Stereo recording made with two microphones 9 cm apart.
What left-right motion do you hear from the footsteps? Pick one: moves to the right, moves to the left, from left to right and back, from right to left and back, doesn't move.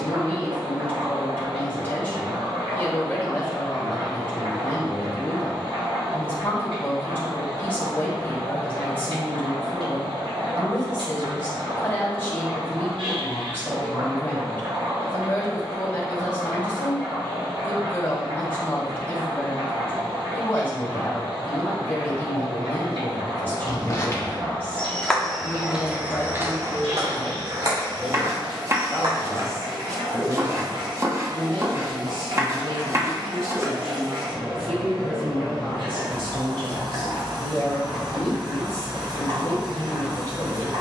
moves to the right.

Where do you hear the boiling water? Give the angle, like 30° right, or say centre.
70° right.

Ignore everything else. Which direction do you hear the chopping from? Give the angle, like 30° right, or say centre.
30° right.